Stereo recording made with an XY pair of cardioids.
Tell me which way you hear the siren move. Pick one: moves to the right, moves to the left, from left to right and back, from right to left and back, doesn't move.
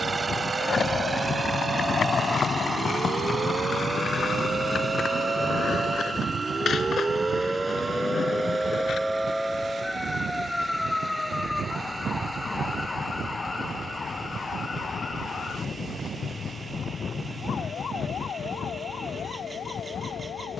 moves to the left.